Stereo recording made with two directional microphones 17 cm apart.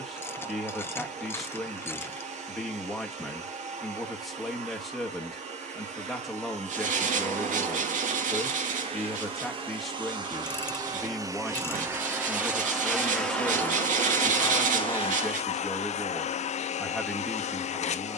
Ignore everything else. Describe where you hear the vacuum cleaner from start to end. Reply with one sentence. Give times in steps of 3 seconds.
You can hear the vacuum cleaner on the right from 0 s, in the centre from 12 s and on the left from 15 s.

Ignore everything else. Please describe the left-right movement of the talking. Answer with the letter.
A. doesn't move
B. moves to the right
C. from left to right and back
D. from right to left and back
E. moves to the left
A.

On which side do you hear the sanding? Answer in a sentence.
You can hear the sanding on the right.